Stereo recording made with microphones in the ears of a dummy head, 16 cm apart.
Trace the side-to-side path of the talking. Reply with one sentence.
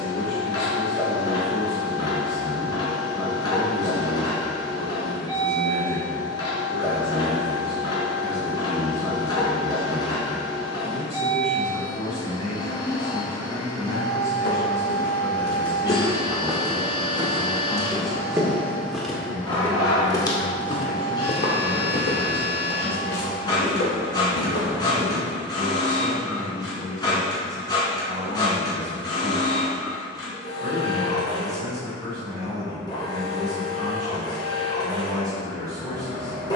You can hear the talking travel towards the right.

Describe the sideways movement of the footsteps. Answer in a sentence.
You can hear the footsteps go right and come back.